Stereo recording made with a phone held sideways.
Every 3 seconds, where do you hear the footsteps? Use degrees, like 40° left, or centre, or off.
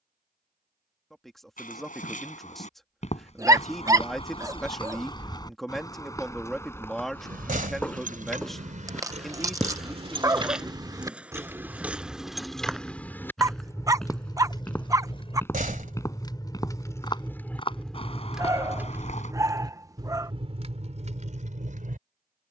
50° left, 30° left, 10° left, centre, centre, 20° left, 40° left, off.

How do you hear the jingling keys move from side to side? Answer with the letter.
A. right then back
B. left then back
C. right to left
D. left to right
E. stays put
B.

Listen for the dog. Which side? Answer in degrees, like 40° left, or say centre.
20° right.